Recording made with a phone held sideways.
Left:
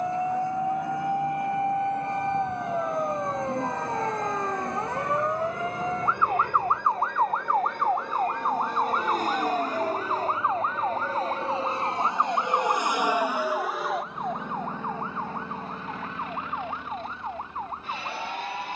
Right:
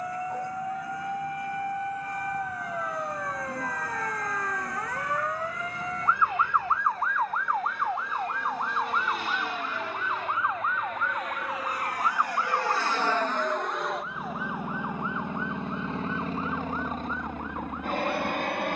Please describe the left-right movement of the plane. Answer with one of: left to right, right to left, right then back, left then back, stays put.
left to right.